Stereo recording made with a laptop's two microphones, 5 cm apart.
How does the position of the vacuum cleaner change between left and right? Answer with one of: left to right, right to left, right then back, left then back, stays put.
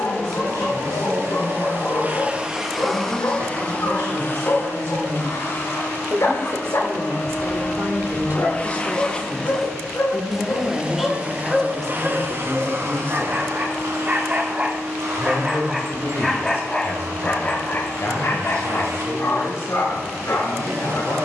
left then back.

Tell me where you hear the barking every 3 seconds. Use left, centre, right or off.
left, left, left, left, right, centre, left.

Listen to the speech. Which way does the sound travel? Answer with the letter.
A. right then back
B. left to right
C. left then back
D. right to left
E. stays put
D.